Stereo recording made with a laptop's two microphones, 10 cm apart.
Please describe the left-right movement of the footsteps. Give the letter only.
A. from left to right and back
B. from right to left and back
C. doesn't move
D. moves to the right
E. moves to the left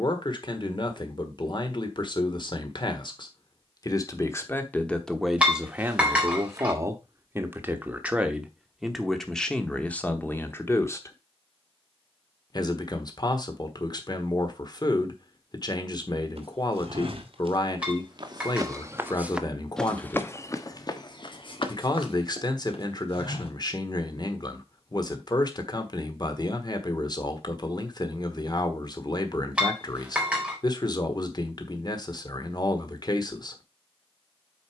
E.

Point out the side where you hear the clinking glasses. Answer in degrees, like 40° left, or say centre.
10° right.